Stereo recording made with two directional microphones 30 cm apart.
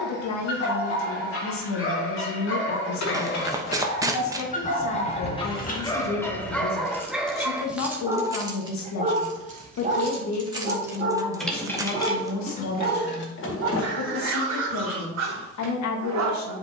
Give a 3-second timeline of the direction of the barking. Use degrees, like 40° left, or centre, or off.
50° left, 20° left, centre, 40° right, 60° right, 60° right.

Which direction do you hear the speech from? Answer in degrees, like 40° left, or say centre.
70° left.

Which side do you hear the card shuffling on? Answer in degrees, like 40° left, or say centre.
10° right.